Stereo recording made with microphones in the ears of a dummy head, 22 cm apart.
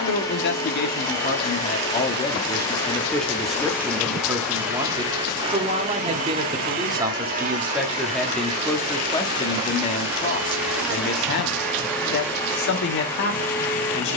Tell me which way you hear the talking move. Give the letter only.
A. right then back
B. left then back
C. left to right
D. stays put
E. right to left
A.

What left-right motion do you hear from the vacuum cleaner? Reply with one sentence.
You can hear the vacuum cleaner go right and come back.